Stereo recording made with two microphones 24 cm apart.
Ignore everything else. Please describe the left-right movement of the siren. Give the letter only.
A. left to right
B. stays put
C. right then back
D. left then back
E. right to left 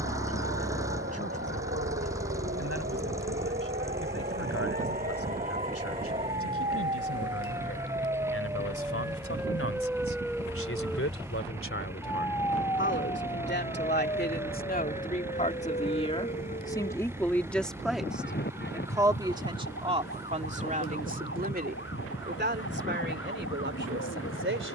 E.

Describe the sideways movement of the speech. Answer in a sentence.
You can hear the speech travel towards the right.